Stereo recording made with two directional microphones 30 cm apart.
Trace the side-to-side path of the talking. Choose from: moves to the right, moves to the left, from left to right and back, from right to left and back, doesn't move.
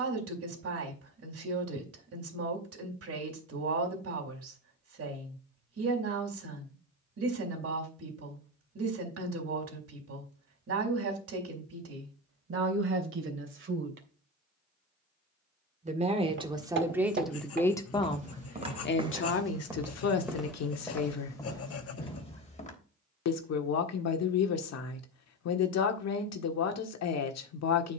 moves to the left.